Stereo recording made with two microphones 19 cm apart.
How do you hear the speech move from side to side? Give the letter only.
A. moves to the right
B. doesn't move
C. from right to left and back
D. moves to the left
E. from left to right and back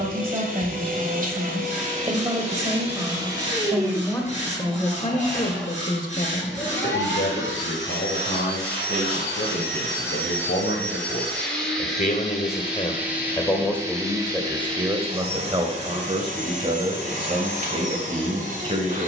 C.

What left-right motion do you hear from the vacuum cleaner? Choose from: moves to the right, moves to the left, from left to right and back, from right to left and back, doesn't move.
from right to left and back.